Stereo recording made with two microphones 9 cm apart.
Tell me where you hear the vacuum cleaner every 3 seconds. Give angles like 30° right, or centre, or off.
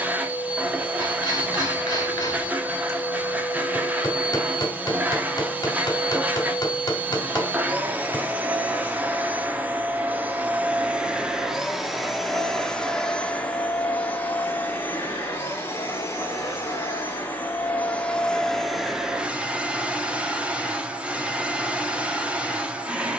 20° right, 20° right, 20° right, 10° right, 10° left, 30° left, 10° right, 10° right.